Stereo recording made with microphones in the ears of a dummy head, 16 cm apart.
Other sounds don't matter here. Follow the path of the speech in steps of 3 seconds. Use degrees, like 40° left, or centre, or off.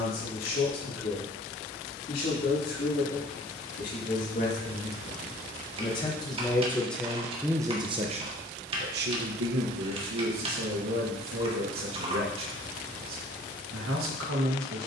50° left, 40° left, 10° right, 80° right, 80° right.